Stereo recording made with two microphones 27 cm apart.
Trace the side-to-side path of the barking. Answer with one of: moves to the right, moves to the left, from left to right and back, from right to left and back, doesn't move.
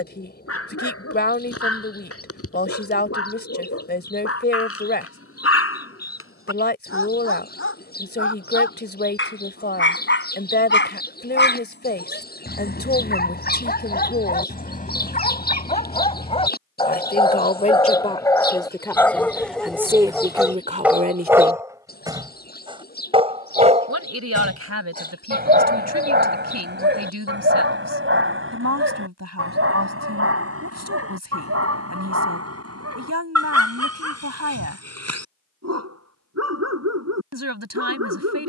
moves to the right.